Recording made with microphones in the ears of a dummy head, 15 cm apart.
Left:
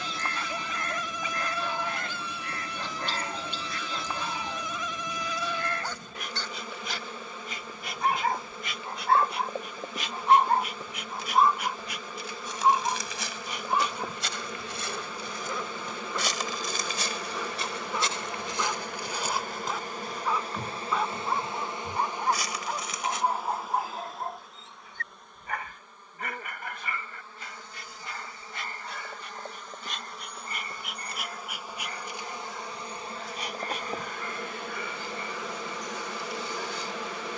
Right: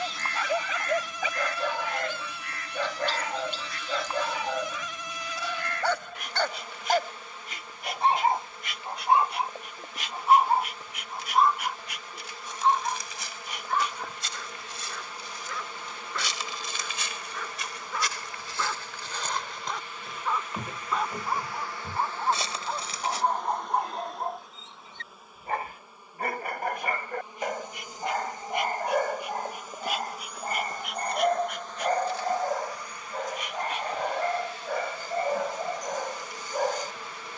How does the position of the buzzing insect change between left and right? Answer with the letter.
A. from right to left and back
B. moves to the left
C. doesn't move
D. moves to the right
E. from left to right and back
E.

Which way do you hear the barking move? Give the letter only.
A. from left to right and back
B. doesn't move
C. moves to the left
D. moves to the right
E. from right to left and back
E.